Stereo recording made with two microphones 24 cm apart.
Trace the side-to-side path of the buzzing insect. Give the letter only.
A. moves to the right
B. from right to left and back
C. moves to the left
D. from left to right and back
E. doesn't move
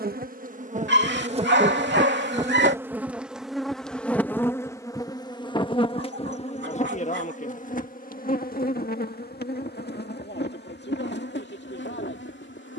C.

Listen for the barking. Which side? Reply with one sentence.
In this clip you hear the barking on the right.